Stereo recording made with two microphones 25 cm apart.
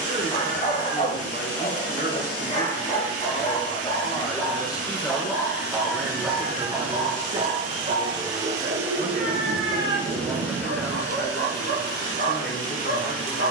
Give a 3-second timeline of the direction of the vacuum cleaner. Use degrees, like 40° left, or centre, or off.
60° right, 60° right, 30° right, 10° left, 20° left.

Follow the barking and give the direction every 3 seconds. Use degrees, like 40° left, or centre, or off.
30° left, 10° left, 30° right, 60° right, 70° right.